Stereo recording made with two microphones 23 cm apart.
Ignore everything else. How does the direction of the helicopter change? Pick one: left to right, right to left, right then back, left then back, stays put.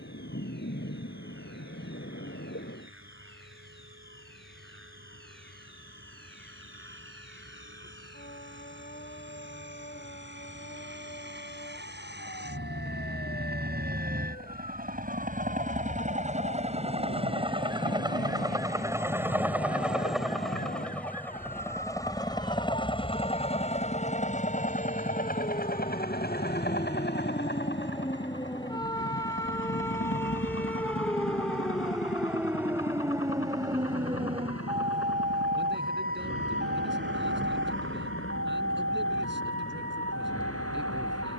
right to left.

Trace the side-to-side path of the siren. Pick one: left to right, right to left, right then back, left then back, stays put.
left to right.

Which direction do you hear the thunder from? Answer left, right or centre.
left.